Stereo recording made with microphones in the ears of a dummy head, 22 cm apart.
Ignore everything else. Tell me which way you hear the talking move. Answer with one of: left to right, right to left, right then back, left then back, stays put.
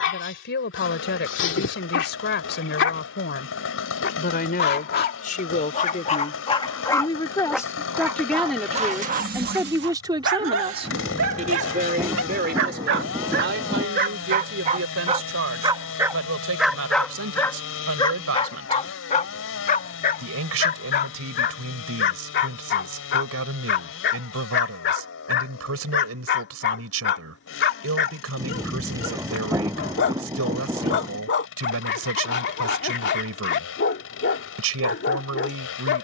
left to right.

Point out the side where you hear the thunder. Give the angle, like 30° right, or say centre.
10° right.